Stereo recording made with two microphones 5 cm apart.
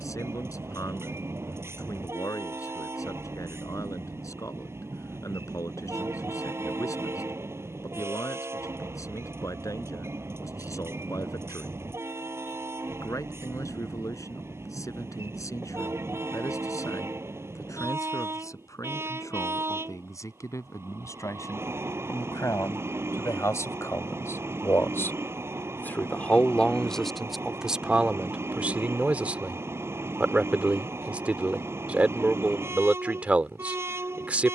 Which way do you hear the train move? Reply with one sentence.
In this clip you hear the train stay put.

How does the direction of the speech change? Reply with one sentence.
In this clip you hear the speech move from left to right.